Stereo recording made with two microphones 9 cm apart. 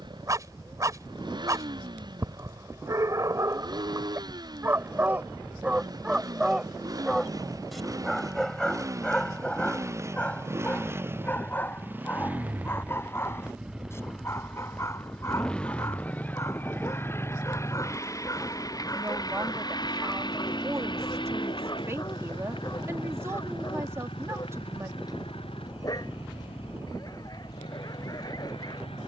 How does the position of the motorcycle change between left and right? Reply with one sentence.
You can hear the motorcycle move to the left.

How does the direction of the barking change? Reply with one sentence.
You can hear the barking move to the left.